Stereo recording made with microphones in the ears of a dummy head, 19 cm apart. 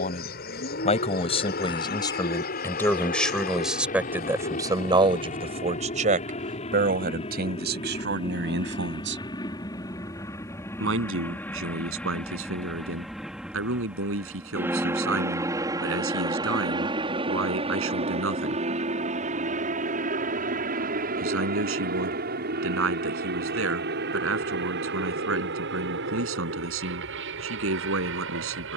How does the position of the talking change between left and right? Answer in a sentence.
You can hear the talking move from left to right.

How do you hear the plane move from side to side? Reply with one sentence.
In this clip you hear the plane travel towards the right.